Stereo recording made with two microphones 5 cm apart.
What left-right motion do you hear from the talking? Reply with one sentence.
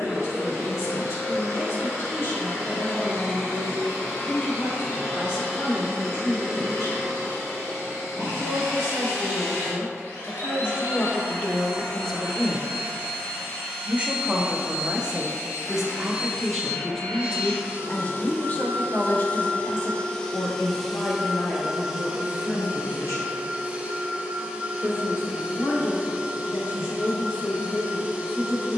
You can hear the talking go right and come back.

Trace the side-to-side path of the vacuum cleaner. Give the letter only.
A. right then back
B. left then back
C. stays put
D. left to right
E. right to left
D.